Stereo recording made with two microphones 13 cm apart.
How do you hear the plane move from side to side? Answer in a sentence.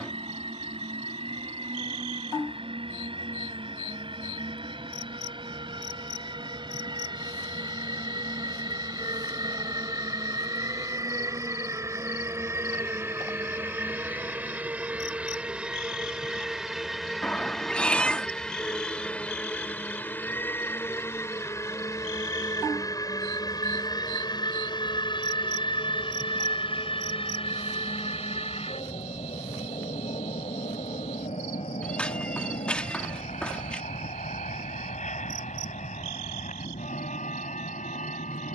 In this clip you hear the plane go from the right side to the left.